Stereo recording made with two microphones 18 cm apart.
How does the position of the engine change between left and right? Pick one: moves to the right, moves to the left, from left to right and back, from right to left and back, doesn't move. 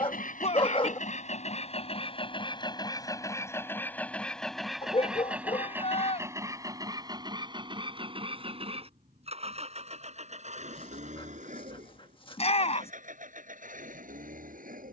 moves to the right.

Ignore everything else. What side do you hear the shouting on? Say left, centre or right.
left.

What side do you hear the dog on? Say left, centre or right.
left.